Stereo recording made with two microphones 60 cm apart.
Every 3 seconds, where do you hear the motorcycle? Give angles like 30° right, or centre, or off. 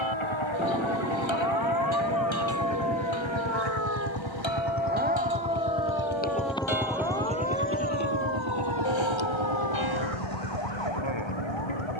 60° left, 40° left, 20° right, 70° right.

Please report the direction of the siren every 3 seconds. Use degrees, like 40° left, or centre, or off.
40° right, 20° right, 10° left, 40° left.